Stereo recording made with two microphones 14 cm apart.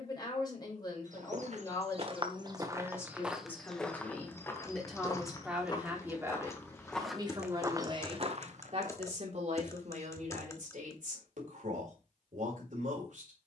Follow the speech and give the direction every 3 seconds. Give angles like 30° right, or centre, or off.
30° left, 10° left, 30° right, 60° right, 70° right.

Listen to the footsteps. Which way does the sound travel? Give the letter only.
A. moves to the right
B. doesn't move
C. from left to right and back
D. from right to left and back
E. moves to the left
D.